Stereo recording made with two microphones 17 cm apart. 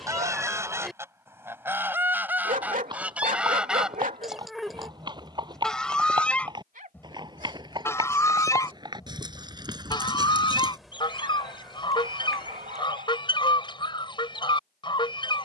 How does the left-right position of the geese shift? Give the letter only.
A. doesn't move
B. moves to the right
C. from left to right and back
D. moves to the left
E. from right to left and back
D.